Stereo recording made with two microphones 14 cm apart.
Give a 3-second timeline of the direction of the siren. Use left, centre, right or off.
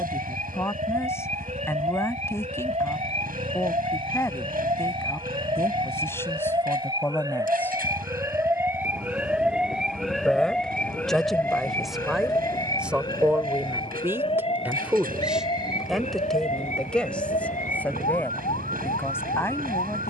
right, right, right, centre, left, left, left.